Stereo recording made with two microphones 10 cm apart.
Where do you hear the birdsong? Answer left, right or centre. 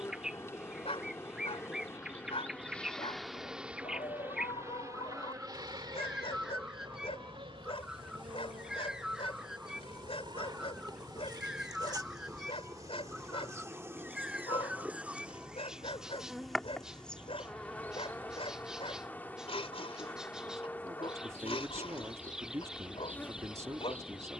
centre.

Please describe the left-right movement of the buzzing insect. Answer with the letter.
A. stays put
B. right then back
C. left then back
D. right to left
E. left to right
B.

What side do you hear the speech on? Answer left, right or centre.
right.